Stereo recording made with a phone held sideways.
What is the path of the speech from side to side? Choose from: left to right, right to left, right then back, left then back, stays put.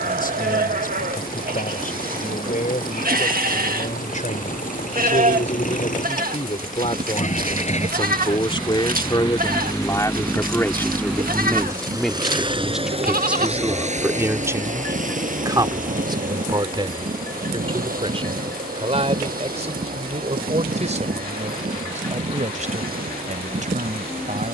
left to right.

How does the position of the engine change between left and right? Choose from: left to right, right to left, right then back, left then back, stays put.
left to right.